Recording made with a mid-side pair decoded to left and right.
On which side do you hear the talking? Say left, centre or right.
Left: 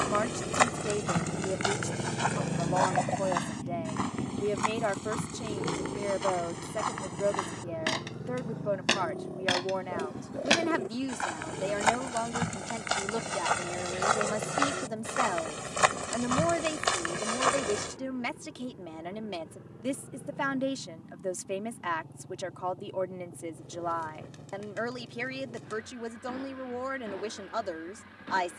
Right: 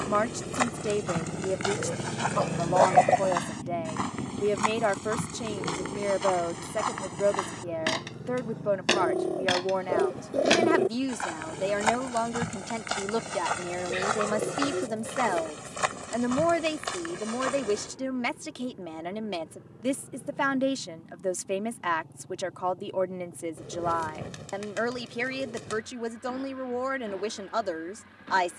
right.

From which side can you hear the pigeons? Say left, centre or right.
right.